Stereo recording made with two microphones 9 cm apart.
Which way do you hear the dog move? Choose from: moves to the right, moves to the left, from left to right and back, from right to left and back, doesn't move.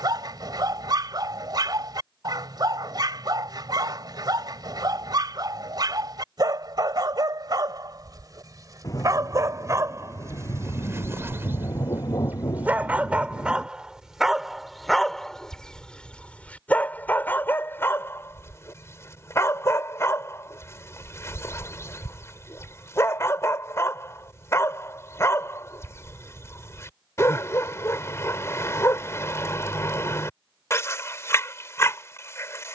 moves to the left.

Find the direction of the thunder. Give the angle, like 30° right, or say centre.
40° left.